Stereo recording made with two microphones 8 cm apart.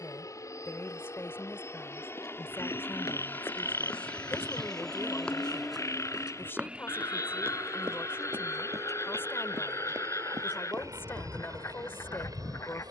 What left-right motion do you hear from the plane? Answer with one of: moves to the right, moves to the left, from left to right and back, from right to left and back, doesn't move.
moves to the right.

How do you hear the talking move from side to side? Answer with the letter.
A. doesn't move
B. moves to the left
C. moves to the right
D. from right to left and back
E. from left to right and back
A.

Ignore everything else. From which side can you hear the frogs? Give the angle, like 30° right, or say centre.
40° left.